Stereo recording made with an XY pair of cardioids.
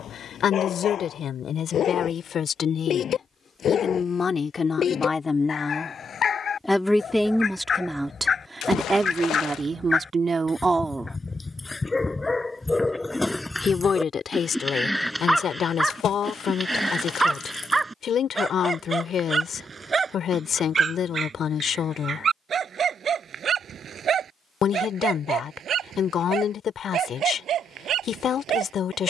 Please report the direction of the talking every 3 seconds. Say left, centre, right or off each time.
left, left, centre, right, left, left, left, left, left, left.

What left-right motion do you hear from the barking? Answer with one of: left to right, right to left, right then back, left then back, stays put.
left to right.